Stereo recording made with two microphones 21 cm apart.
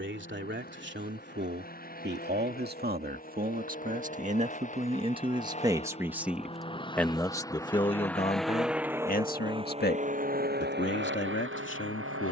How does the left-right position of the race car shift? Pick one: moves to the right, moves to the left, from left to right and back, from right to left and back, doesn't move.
moves to the right.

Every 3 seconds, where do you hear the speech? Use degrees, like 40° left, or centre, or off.
50° right, 30° right, 20° left, 50° left.